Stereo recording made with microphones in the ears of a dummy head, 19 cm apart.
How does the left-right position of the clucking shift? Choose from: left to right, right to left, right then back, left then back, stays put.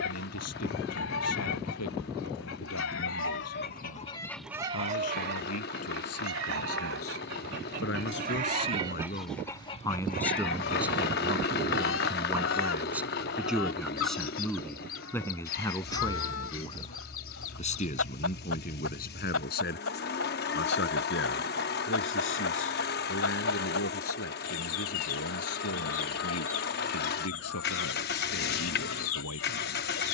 right then back.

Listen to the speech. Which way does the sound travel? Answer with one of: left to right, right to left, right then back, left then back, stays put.
right then back.